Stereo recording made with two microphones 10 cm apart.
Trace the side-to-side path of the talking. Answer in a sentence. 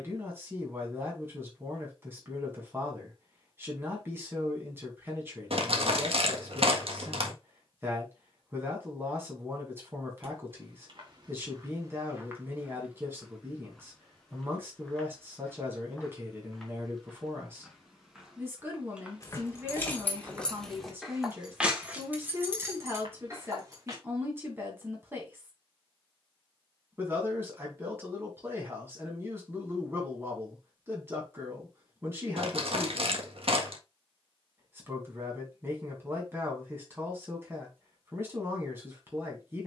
In this clip you hear the talking stay in one place.